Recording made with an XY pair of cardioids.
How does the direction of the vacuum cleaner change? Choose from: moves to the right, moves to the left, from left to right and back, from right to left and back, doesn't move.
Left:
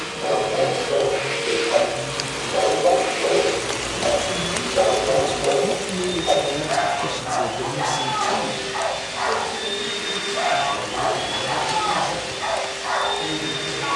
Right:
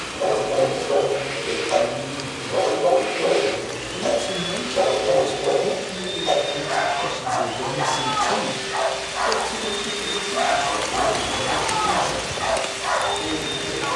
from left to right and back.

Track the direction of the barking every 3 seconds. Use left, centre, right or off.
right, centre, right, right, right.